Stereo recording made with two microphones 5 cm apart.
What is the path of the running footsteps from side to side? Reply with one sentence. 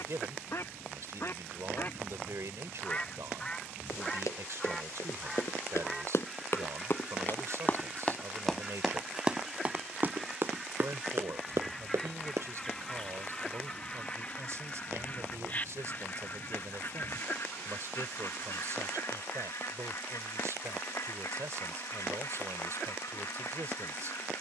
In this clip you hear the running footsteps move to the right.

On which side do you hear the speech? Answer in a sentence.
You can hear the speech on the right.